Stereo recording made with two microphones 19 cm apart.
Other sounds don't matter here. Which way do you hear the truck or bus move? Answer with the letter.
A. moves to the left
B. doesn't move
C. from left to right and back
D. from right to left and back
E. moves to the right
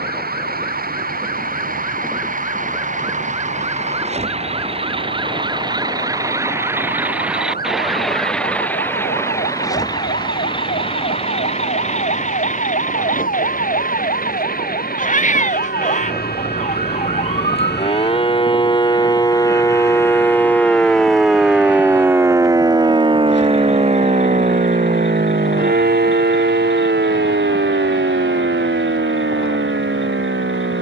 A.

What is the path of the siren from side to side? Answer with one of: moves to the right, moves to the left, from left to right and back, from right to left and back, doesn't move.
moves to the right.